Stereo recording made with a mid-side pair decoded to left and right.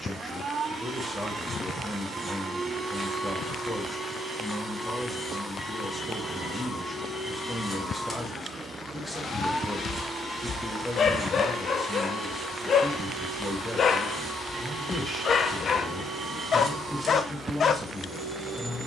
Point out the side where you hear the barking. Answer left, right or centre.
left.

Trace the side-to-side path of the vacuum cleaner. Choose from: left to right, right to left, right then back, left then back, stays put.
left then back.